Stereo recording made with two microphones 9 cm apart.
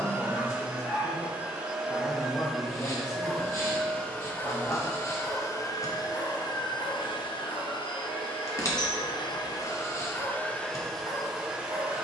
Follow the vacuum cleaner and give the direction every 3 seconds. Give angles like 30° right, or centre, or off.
10° right, 20° left, 60° left, 20° left.